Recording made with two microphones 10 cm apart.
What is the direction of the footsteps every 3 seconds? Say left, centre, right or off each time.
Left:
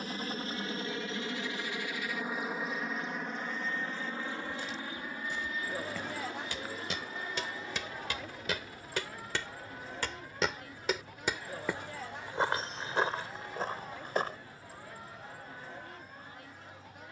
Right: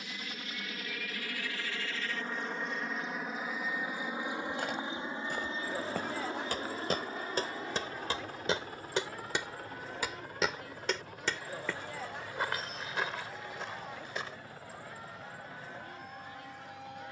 off, right, right, centre, left, off.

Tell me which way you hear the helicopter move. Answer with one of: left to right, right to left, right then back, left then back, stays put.
left to right.